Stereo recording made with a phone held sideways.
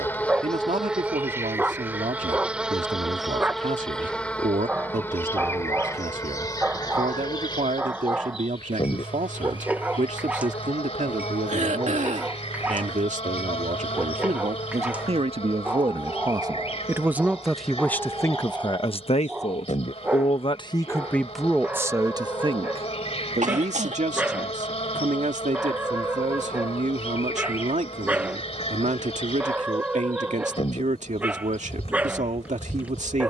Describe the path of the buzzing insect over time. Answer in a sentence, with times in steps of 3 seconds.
You can hear the buzzing insect in the centre from 0 s and on the left from 6 s.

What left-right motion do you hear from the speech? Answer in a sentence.
In this clip you hear the speech move from right to left and back again.